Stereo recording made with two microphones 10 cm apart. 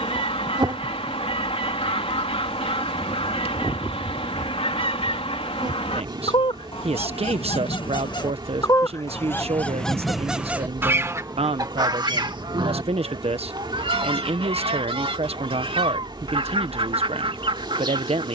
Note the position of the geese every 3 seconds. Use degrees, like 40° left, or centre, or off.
70° left, 70° left, 50° left, 10° right, 60° right, 60° right.